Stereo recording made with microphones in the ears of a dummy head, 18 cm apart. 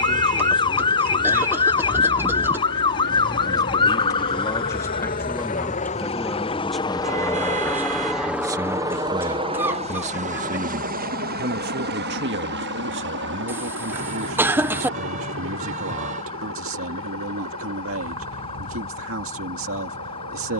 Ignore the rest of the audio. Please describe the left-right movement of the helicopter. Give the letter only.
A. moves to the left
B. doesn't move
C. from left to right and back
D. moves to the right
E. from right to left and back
D.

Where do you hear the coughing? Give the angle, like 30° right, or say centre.
10° right.